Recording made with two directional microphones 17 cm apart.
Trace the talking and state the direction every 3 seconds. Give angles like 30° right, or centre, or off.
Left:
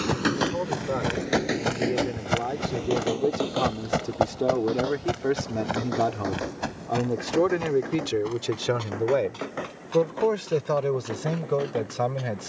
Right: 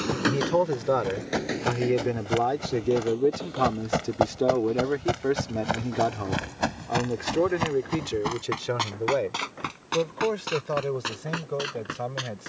40° right, 10° right, 20° left, 40° left.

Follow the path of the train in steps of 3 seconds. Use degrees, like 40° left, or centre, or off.
30° left, 50° left, 60° left, 60° left.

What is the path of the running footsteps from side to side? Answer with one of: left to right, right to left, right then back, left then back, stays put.
left to right.